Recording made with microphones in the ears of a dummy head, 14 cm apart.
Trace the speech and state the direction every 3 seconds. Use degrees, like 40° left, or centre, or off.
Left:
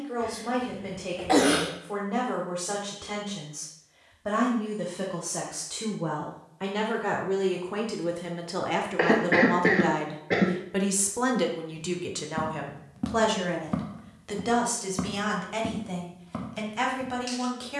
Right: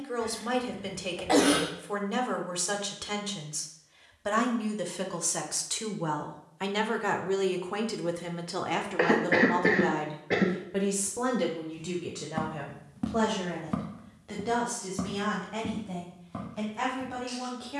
60° right, 50° right, 20° right, 20° left, 40° left, 50° left.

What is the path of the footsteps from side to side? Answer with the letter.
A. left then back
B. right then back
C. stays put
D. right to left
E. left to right
D.